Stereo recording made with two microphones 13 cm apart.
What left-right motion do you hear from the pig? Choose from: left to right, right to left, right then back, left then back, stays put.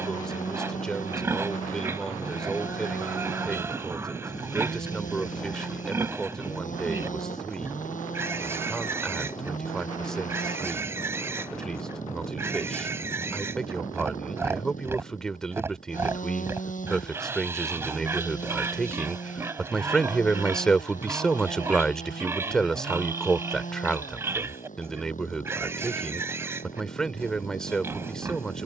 stays put.